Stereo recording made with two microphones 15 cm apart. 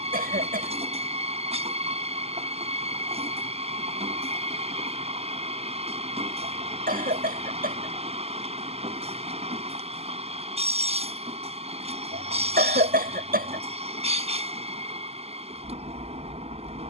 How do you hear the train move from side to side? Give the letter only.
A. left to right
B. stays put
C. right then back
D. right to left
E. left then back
B.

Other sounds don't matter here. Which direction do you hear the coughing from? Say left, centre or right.
right.